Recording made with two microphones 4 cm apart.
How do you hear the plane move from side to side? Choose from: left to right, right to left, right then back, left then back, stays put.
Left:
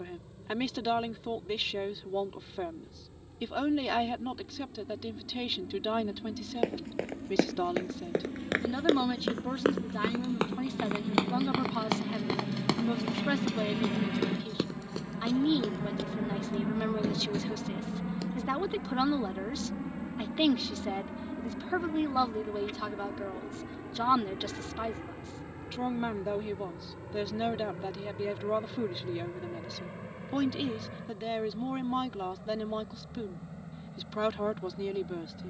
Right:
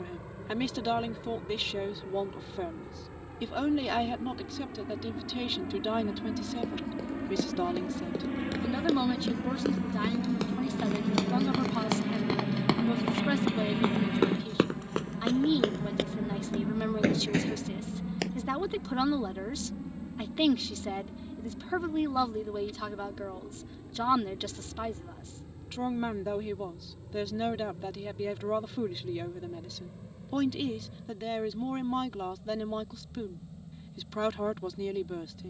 right to left.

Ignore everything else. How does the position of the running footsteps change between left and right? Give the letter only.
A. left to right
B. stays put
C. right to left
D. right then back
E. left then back
A.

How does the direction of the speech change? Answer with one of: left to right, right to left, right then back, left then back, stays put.
stays put.